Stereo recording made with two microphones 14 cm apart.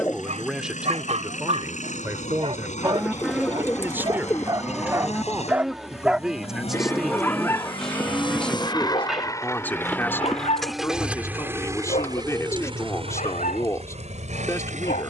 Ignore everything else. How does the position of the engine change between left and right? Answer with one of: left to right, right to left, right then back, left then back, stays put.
left to right.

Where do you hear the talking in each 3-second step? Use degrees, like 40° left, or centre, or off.
10° right, 10° right, centre, 20° left, 20° left.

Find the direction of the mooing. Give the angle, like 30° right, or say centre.
centre.